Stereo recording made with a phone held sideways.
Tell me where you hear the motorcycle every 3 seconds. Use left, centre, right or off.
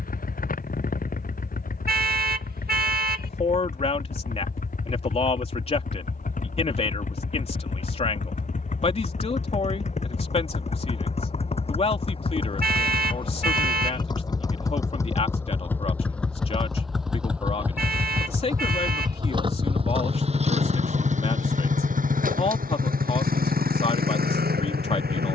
left, left, left, left, left, centre, right, right, right.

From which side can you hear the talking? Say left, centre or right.
left.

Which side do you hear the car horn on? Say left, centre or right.
right.